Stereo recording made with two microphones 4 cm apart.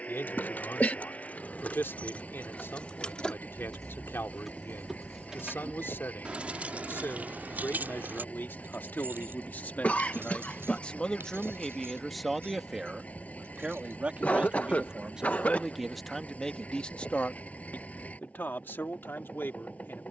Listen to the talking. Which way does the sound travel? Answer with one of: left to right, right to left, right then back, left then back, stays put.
right then back.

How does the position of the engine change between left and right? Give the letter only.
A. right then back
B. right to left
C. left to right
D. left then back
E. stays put
E.